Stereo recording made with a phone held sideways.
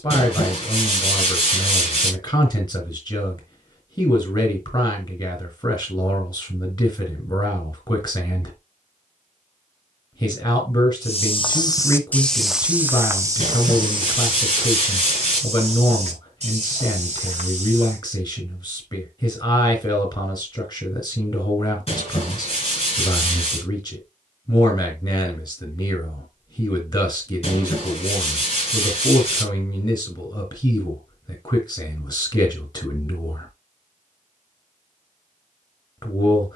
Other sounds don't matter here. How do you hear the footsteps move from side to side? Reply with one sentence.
In this clip you hear the footsteps move to the right.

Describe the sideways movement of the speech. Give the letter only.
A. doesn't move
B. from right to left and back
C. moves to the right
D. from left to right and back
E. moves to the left
A.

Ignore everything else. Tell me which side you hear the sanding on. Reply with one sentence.
You can hear the sanding on the left.